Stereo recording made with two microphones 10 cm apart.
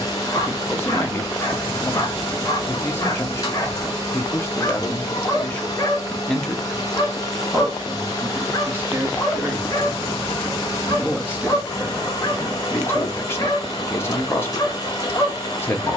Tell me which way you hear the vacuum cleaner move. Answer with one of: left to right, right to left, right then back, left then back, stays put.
stays put.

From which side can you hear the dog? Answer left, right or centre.
left.